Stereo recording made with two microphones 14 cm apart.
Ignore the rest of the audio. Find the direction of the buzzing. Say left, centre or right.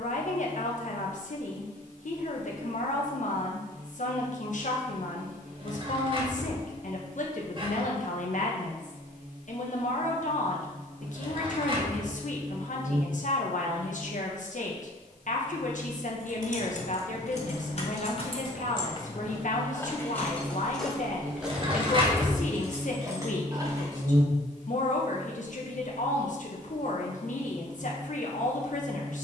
right.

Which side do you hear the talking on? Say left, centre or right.
left.